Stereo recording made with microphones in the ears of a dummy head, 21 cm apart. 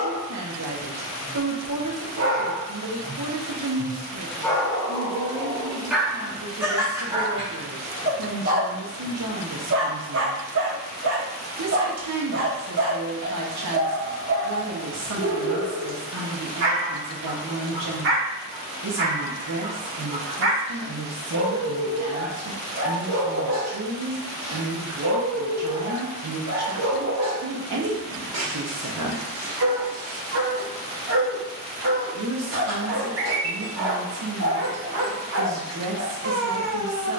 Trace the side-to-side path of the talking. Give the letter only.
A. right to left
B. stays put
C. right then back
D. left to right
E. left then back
B.